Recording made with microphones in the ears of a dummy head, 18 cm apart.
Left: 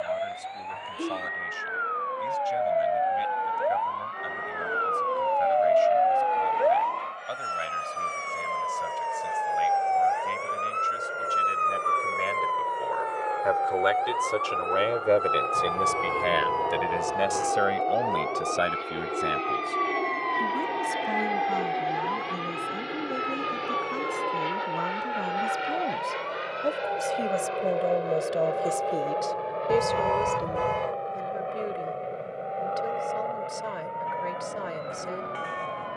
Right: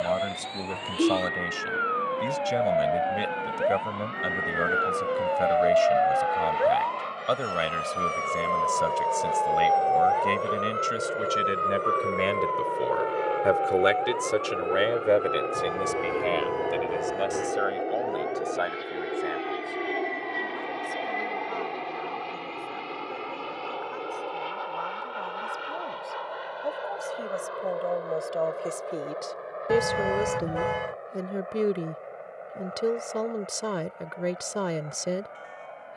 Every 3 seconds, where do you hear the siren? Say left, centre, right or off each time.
right, right, centre, left, left, left, left, left, left, left, left, left.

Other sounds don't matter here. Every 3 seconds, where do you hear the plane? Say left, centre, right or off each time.
right, right, right, right, right, right, centre, centre, left, left, left, left.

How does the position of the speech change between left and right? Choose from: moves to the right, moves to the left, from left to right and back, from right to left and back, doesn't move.
from right to left and back.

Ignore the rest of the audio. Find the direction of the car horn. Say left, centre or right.
centre.